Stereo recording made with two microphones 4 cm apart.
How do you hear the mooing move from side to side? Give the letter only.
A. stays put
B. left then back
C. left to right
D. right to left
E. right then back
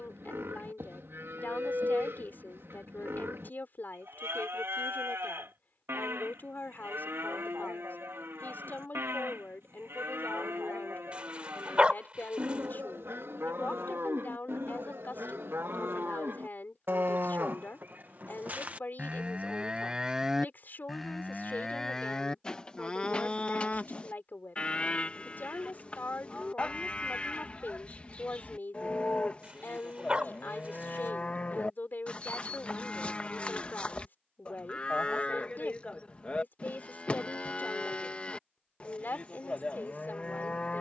D.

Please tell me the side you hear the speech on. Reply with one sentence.
You can hear the speech on the left.